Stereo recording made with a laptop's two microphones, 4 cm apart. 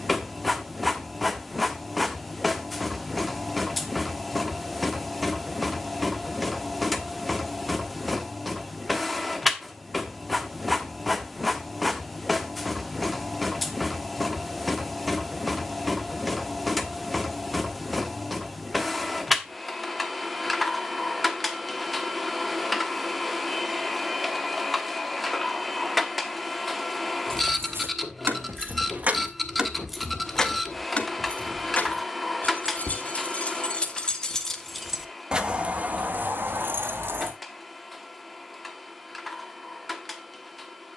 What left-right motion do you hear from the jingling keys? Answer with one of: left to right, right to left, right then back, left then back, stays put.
left then back.